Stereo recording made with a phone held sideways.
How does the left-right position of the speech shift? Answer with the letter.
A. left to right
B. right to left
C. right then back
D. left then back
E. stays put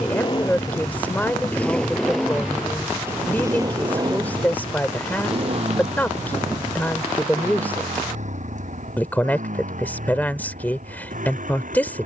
E.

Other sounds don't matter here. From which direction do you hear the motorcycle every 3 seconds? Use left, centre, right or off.
centre, right, right, right.